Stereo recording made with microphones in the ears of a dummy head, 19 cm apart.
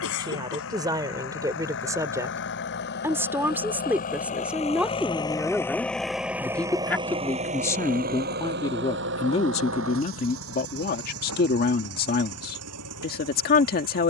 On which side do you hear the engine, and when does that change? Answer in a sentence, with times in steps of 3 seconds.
In this clip you hear the engine on the left from 0 s and on the right from 6 s.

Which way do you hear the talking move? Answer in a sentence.
You can hear the talking go from the right side to the left.